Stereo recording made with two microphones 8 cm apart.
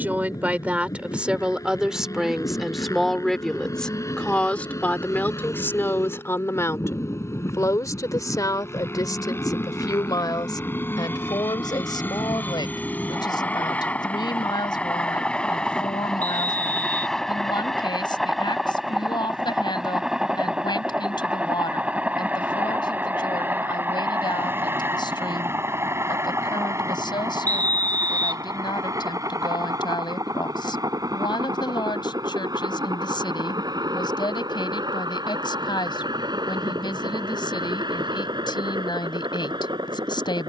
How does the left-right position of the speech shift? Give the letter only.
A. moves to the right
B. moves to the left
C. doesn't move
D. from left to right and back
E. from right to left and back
B.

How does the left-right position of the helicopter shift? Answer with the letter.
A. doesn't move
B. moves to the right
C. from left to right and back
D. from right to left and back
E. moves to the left
B.